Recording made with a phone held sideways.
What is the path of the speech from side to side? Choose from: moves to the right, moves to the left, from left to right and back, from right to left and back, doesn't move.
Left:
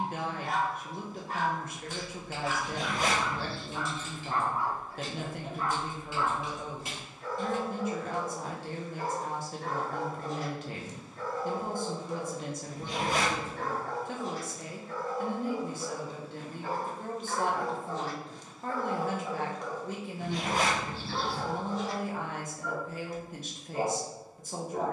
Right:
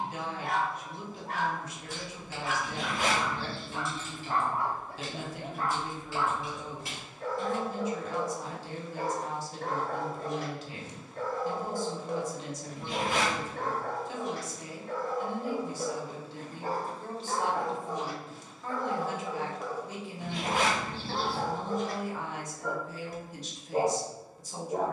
doesn't move.